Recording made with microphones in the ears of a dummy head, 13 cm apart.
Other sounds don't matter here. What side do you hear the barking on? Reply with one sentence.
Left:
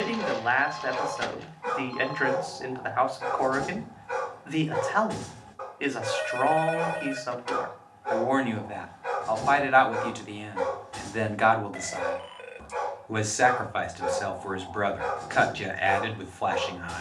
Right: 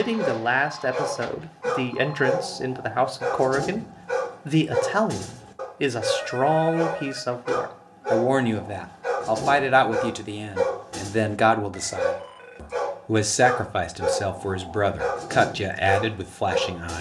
You can hear the barking on the right.